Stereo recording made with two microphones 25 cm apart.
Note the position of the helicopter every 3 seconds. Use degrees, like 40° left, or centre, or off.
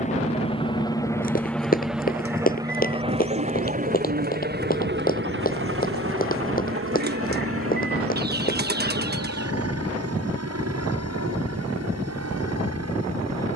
centre, 40° right, 60° right, 70° right, 70° right.